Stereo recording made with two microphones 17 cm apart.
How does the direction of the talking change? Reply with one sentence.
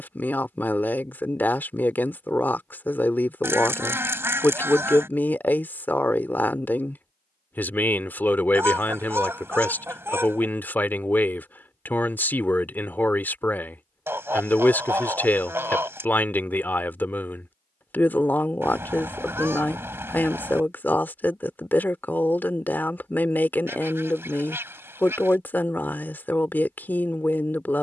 In this clip you hear the talking stay put.